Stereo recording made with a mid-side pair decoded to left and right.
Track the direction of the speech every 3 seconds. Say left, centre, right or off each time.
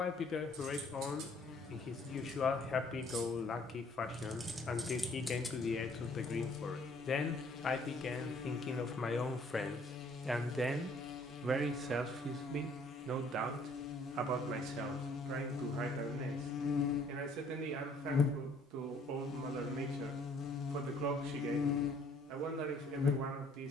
left, left, left, centre, right, right, right, right.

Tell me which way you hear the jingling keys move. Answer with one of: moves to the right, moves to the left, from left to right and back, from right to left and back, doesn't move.
moves to the left.